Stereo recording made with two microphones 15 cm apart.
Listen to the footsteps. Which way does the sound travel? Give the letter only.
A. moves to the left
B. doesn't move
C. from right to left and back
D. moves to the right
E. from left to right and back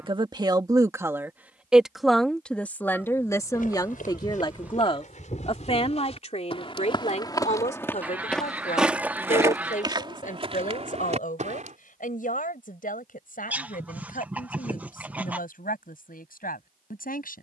D.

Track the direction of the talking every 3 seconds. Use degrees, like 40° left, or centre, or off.
10° right, 30° left, 50° left, 60° left, 60° left, 60° left.